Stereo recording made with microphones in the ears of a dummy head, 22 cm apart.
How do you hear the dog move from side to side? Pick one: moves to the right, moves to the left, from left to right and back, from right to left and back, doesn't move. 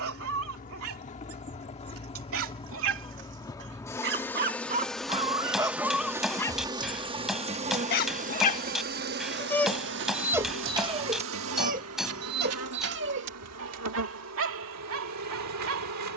from right to left and back.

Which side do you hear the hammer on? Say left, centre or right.
centre.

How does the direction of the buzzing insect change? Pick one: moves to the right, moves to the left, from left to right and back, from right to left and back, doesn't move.
moves to the right.